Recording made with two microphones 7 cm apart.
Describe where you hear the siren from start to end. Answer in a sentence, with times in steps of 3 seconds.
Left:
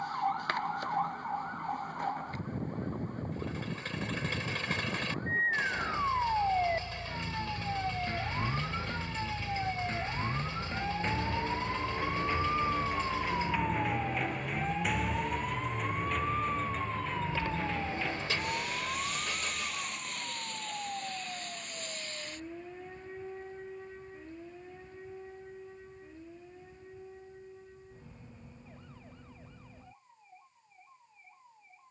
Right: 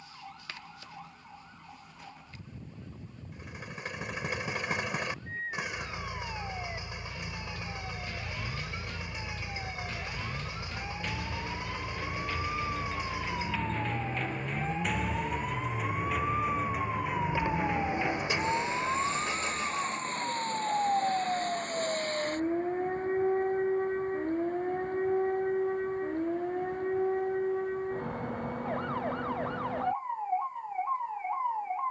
In this clip you hear the siren on the left from 0 s, in the centre from 12 s and on the right from 18 s.